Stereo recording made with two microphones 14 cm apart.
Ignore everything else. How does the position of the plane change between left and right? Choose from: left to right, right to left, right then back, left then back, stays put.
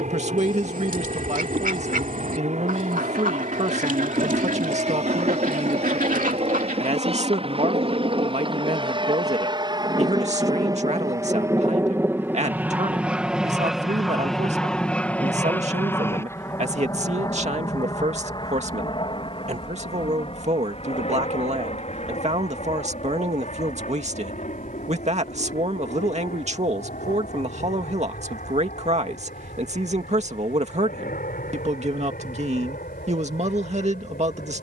right to left.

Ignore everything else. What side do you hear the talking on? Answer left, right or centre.
right.